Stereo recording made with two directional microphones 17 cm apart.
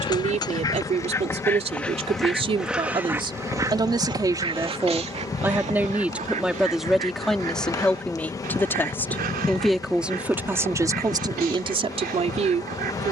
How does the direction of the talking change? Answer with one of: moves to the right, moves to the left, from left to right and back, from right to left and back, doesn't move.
from right to left and back.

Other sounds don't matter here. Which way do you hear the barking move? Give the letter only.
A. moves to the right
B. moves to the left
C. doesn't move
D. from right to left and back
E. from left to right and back
A.